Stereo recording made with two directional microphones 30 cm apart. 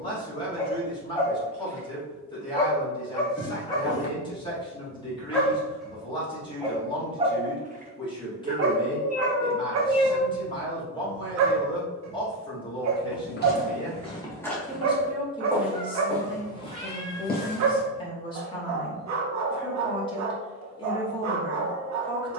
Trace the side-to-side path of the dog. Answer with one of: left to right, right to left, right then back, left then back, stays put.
left to right.